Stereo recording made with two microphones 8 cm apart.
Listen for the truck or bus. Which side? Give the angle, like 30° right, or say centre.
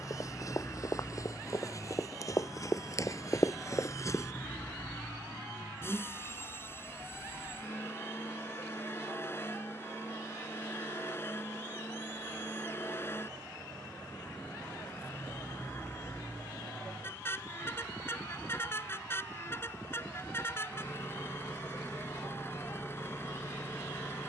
30° left.